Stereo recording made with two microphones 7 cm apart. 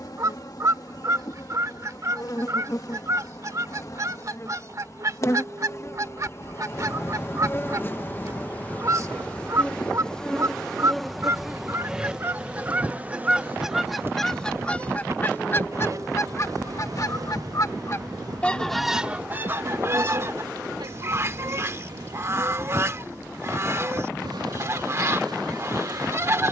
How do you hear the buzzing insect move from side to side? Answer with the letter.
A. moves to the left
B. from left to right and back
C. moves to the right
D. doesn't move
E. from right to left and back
C.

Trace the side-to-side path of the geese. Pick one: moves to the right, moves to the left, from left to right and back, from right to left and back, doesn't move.
from right to left and back.